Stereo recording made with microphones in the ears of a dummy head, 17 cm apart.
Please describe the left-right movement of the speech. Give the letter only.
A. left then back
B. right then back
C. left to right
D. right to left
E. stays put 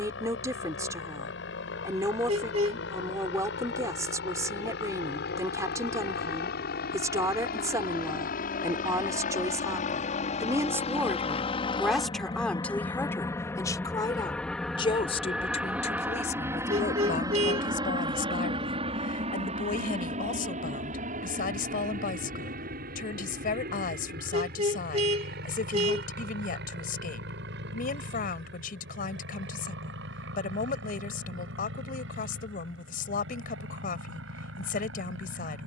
D.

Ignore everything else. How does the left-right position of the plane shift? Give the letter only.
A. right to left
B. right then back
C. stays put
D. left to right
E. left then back
D.